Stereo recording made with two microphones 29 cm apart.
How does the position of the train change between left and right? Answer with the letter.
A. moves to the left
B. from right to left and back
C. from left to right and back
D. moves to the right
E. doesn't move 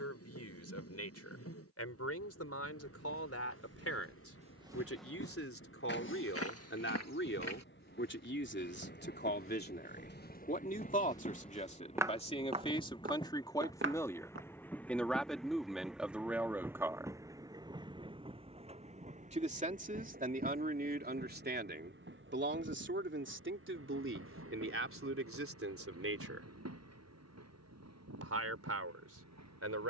D.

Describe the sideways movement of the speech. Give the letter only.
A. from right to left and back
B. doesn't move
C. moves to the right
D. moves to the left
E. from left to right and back
C.